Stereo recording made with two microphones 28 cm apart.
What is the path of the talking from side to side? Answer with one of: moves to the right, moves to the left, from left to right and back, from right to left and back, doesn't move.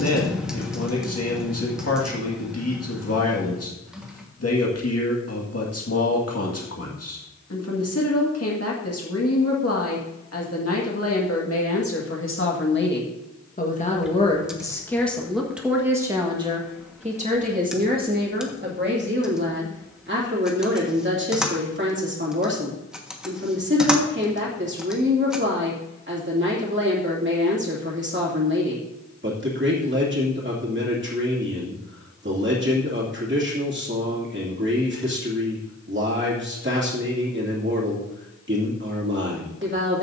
moves to the right.